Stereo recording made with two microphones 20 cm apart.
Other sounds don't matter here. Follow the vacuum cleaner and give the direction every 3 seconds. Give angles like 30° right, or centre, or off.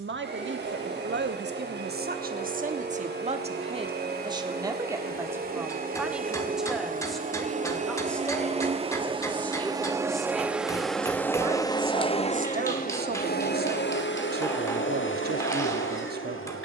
60° right, 50° right, 40° right, centre, 50° left, 80° left.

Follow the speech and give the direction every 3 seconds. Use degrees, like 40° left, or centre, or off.
50° right, 20° right, centre, centre, 50° right, 50° right.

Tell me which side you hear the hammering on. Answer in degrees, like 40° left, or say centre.
10° left.